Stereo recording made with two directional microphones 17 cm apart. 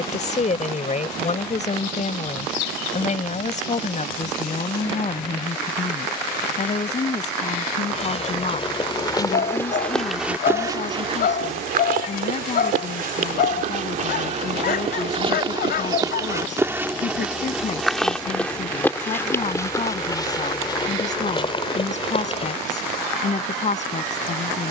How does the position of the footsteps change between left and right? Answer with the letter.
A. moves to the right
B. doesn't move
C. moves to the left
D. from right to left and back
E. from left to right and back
E.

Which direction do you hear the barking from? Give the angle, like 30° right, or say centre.
60° left.